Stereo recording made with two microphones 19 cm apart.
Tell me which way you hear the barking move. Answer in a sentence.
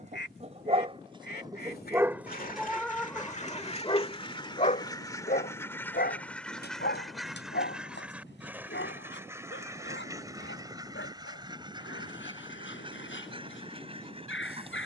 You can hear the barking move to the left.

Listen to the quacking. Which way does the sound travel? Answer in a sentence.
In this clip you hear the quacking go from the left side to the right.